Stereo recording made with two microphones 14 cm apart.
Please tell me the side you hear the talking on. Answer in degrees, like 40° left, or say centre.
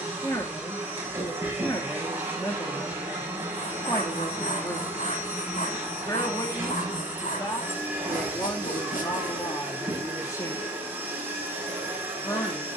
20° left.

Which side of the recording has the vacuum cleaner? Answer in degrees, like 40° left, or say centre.
10° right.